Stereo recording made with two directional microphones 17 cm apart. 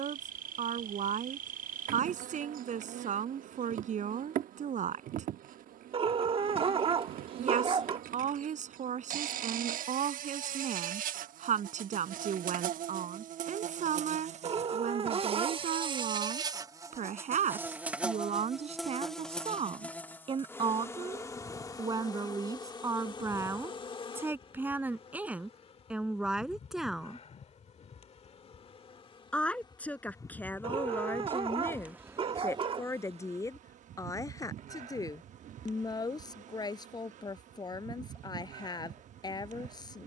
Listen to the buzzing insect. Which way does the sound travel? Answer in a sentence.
In this clip you hear the buzzing insect go left and come back.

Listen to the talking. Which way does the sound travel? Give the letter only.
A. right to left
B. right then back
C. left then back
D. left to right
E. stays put
A.